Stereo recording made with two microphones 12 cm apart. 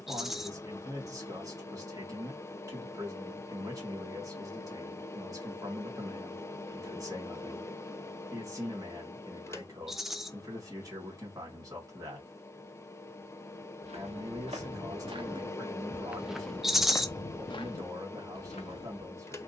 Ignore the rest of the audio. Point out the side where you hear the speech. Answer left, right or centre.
right.